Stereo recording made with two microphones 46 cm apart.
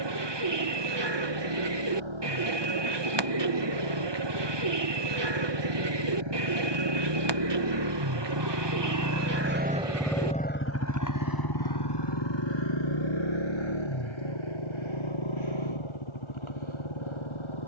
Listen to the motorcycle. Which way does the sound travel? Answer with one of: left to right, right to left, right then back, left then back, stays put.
right to left.